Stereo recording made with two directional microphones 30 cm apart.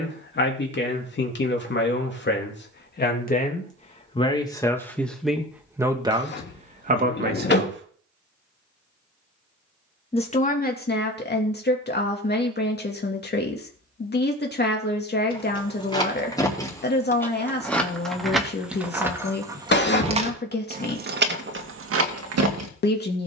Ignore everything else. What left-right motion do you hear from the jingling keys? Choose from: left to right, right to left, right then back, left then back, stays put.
left to right.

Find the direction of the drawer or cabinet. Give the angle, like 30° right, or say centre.
40° left.